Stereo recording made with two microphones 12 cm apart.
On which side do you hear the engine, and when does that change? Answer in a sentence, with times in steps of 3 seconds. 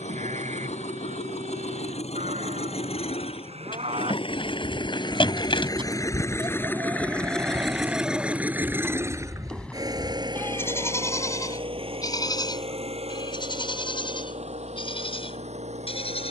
In this clip you hear the engine on the left from 0 s, in the centre from 6 s and on the right from 9 s.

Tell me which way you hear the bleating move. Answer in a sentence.
In this clip you hear the bleating go from the right side to the left.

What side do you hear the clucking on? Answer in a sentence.
In this clip you hear the clucking on the left.